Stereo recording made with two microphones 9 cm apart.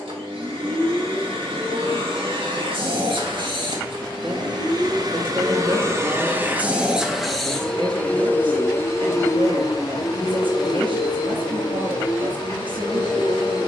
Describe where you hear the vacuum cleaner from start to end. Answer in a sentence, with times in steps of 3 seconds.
In this clip you hear the vacuum cleaner on the right from 0 s, in the centre from 6 s and on the left from 9 s.